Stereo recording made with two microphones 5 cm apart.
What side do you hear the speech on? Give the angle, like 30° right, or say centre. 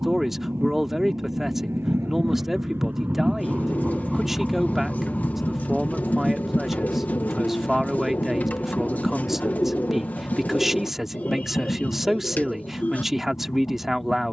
10° right.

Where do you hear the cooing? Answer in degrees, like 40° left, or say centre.
40° left.